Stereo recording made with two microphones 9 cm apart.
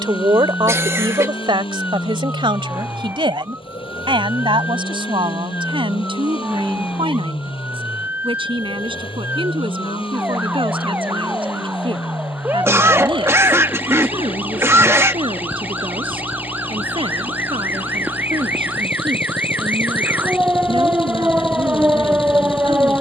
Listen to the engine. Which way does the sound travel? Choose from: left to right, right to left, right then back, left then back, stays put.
stays put.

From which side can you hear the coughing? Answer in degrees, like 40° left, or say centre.
30° right.